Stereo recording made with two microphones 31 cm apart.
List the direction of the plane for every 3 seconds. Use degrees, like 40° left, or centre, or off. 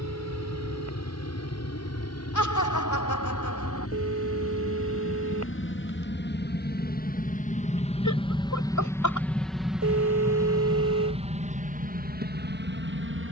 60° left, 50° left, 20° left, 10° right, 30° right.